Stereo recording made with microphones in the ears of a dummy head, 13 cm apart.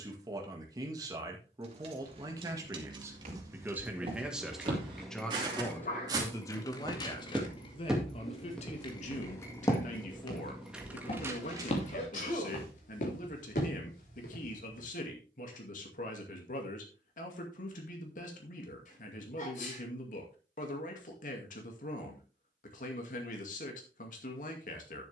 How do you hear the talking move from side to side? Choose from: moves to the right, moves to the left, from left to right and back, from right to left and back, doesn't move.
moves to the left.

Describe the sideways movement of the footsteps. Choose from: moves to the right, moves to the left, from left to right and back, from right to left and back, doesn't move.
moves to the left.